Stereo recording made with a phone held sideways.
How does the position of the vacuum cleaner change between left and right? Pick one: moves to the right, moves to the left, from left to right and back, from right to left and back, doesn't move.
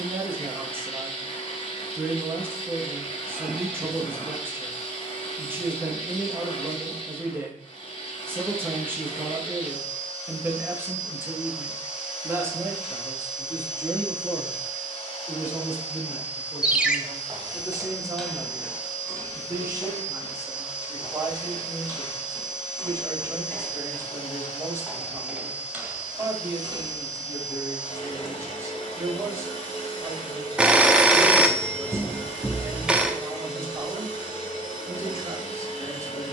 doesn't move.